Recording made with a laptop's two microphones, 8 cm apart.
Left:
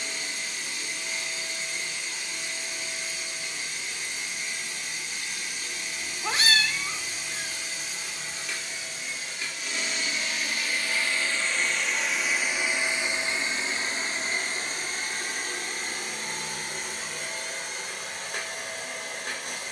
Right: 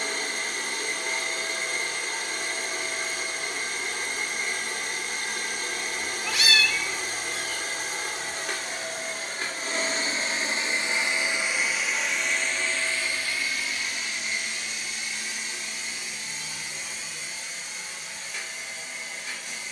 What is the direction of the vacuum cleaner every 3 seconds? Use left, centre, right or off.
right, right, right, right, left, left, left.